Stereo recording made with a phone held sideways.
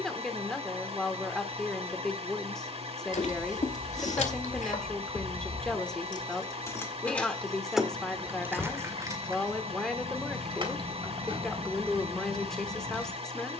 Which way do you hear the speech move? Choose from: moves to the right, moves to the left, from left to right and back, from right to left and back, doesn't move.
doesn't move.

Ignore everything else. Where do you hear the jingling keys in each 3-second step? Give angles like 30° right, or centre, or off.
off, 60° left, centre, 40° right, 50° right.